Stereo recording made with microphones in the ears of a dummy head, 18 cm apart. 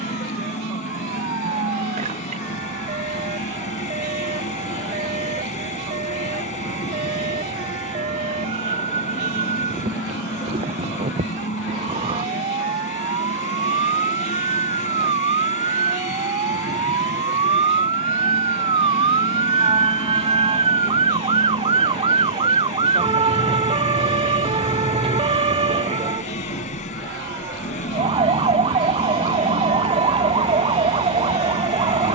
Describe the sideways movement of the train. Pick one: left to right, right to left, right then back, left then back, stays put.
stays put.